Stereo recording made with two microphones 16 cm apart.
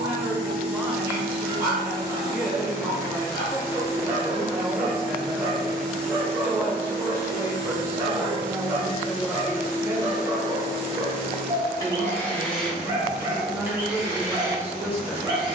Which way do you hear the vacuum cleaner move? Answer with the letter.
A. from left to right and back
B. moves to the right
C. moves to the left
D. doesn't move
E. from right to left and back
E.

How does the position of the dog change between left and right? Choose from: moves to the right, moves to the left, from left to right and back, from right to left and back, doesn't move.
doesn't move.